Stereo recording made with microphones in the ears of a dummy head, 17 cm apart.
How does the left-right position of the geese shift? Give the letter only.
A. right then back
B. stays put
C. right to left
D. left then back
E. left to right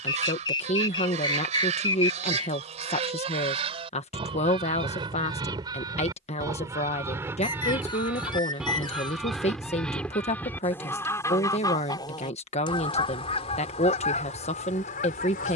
C.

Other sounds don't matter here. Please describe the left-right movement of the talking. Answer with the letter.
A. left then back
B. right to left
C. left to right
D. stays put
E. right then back
D.